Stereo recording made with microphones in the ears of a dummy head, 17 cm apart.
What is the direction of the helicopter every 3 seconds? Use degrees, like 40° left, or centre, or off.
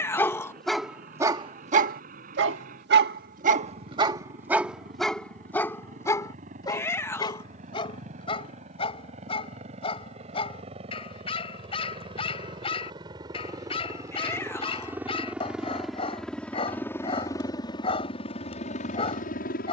50° right, 50° right, 40° right, 40° right, 20° right, 10° left, 40° left.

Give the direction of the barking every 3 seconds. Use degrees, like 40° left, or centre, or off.
30° right, 20° right, 30° left, 30° left, 30° left, 30° left, 30° left.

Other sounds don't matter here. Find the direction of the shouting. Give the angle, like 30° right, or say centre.
10° left.